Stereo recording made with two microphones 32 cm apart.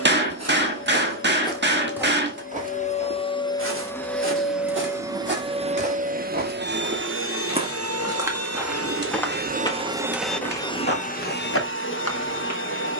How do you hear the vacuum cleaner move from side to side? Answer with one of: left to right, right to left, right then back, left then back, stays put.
right then back.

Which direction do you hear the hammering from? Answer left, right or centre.
right.